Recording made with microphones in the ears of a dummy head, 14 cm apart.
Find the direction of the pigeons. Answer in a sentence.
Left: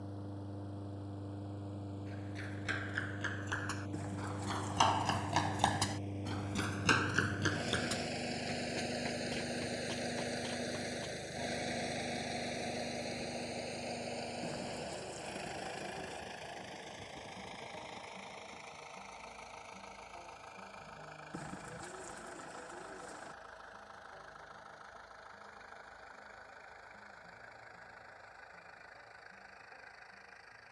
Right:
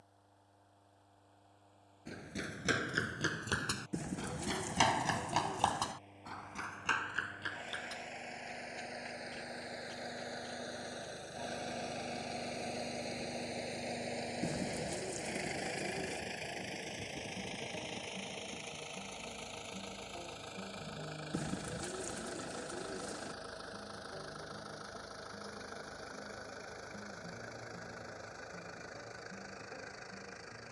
In this clip you hear the pigeons on the right.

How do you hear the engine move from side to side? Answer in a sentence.
You can hear the engine move from left to right.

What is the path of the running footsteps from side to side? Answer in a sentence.
In this clip you hear the running footsteps move to the left.